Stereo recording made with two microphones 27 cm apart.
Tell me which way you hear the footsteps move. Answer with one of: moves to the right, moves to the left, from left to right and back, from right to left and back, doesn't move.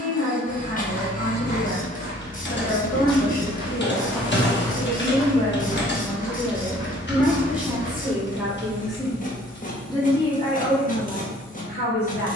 from left to right and back.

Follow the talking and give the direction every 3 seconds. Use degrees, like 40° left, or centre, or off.
40° left, 30° left, centre, 20° left.